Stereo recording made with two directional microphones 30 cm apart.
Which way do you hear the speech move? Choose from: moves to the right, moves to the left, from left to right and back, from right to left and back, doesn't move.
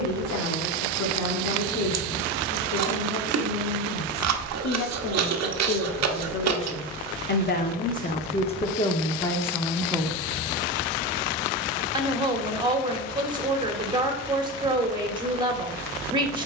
moves to the right.